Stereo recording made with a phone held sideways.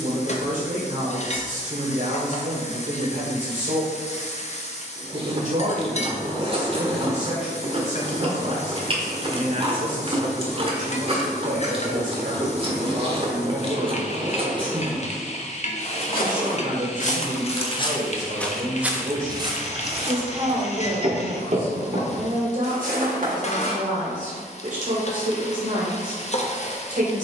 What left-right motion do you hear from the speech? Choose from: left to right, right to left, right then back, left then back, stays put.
stays put.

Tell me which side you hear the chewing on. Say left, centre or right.
right.